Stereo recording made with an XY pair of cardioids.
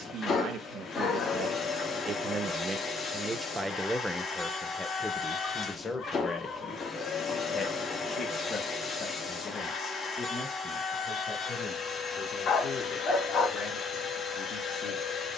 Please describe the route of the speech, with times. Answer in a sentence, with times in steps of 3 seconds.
In this clip you hear the speech on the right from 0 s, in the centre from 3 s and on the left from 6 s.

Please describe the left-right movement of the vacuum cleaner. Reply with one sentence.
In this clip you hear the vacuum cleaner stay in one place.